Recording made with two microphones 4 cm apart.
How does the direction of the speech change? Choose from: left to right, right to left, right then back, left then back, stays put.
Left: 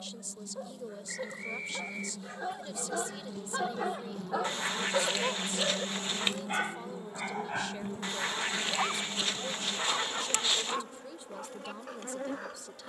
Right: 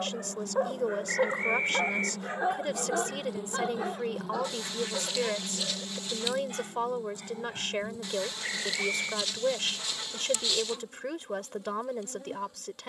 stays put.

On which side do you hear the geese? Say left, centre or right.
left.